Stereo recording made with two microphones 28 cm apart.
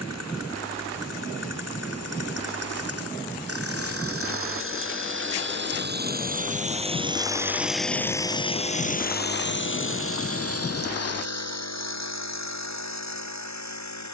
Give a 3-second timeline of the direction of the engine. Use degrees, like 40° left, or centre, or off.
60° right, 50° right, 10° right, 50° left, 70° left.